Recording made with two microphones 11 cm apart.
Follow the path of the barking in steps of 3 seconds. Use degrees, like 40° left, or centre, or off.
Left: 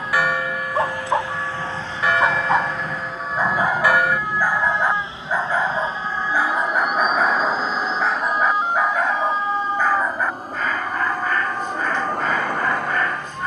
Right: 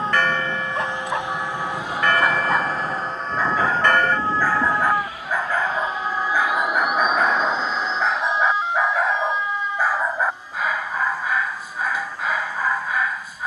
30° left, 20° left, centre, 10° right, 10° right.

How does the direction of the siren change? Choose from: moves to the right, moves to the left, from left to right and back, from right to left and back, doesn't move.
moves to the left.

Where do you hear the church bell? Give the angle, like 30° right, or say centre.
10° left.